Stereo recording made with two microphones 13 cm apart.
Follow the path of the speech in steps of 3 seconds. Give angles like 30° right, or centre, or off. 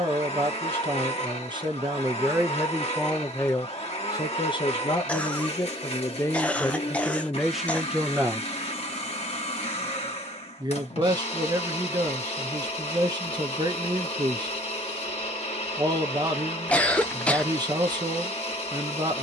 30° right, 30° left, centre, 30° right, 30° right, 30° right, 30° right.